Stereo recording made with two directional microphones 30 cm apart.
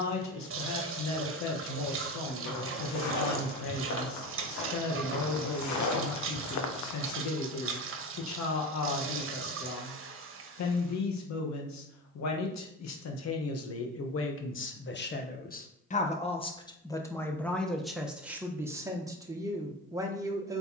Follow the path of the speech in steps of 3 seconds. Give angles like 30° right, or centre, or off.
60° left, 60° left, 60° left, 60° left, 50° left, 20° left, 10° right.